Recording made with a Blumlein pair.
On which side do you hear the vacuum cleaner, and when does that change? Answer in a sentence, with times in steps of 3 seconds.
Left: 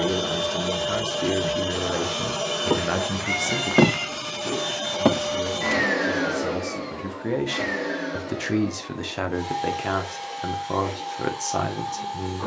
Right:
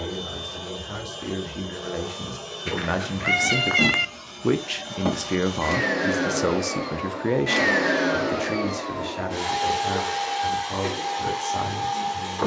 You can hear the vacuum cleaner on the left from 0 s and on the right from 6 s.